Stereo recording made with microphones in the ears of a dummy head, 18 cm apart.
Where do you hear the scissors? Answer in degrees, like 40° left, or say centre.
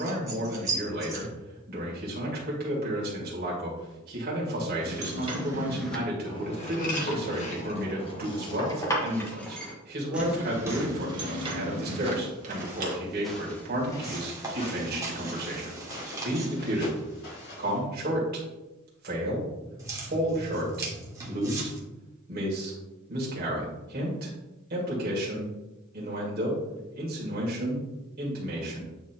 20° right.